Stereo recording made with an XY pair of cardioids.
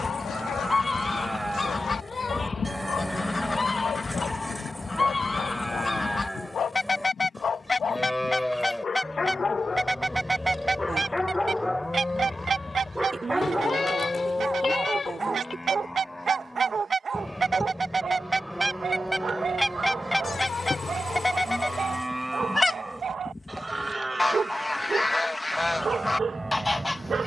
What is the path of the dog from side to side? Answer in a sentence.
You can hear the dog travel towards the right.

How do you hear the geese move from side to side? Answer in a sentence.
You can hear the geese move from left to right and back again.